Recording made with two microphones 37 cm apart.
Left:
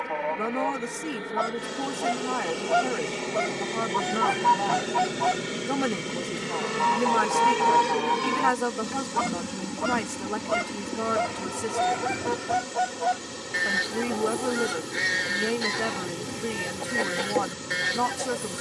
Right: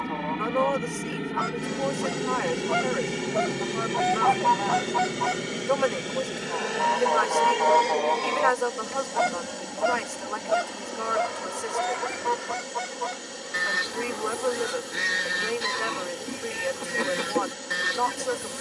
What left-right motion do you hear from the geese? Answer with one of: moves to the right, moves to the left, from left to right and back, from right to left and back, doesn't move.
from right to left and back.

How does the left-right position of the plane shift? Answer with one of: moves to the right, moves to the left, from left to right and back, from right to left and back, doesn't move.
moves to the left.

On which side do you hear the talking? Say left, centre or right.
left.